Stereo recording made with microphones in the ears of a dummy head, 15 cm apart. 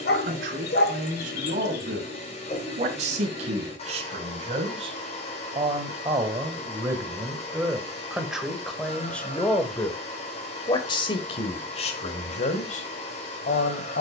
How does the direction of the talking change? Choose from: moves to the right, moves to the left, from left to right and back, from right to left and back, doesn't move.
moves to the left.